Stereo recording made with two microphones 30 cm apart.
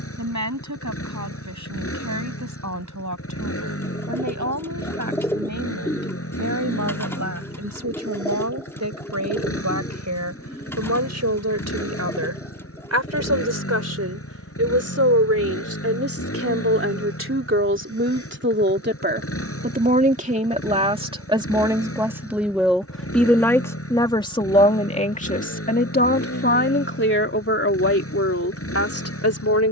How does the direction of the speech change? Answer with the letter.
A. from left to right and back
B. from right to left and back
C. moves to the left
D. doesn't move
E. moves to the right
C.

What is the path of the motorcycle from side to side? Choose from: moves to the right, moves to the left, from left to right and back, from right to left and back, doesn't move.
doesn't move.